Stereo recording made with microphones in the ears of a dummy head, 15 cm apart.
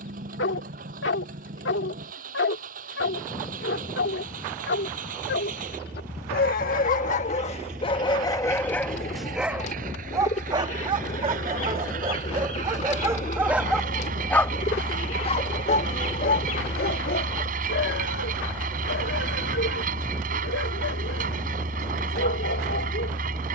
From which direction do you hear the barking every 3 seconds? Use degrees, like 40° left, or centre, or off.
70° left, 70° left, 30° left, 20° right, 10° right, 60° left, 70° left, 70° left.